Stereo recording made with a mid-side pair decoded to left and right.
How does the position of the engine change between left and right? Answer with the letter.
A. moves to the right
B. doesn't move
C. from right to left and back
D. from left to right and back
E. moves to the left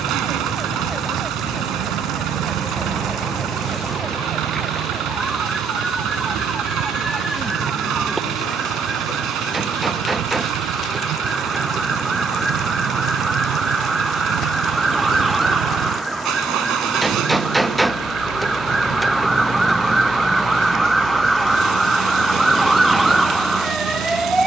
B.